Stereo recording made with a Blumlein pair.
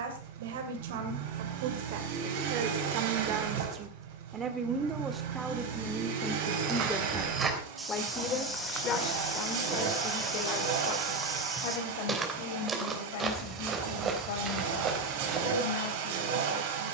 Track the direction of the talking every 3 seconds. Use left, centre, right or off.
right, right, centre, left, left, left.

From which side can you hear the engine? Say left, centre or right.
right.